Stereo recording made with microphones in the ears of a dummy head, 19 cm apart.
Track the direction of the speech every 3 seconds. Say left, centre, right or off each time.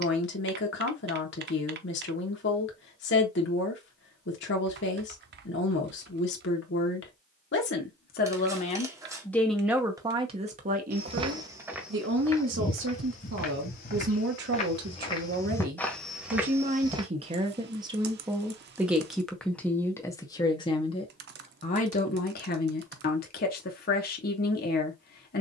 left, left, left, right, right, right, centre, left, left.